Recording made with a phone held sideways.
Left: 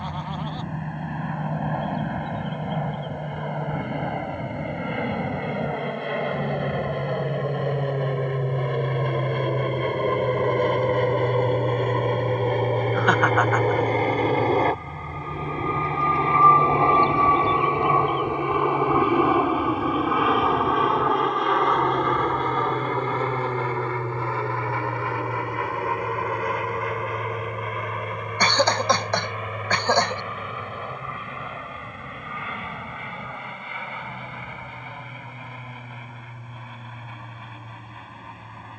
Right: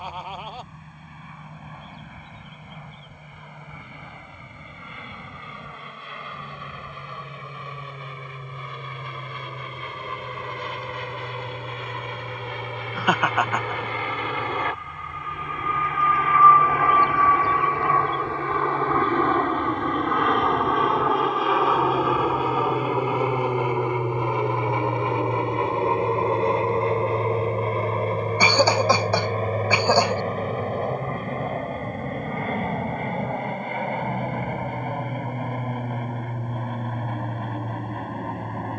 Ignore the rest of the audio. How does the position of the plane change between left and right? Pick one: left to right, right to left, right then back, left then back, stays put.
left to right.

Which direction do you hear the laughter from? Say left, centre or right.
centre.